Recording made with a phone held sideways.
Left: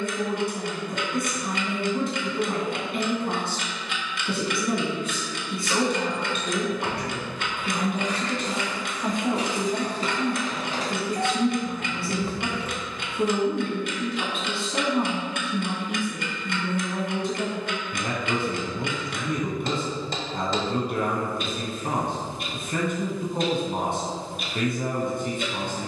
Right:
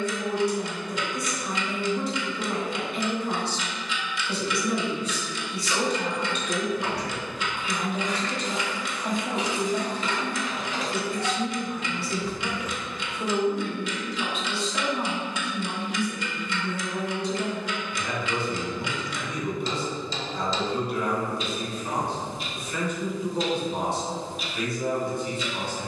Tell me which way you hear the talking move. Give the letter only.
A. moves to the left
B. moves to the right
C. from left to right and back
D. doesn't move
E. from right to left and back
D.